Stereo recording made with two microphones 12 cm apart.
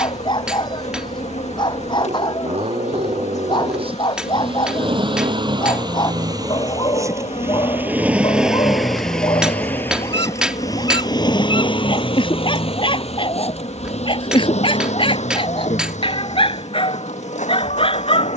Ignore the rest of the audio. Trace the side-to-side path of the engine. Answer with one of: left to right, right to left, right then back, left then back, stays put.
right to left.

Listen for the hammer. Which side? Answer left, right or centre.
centre.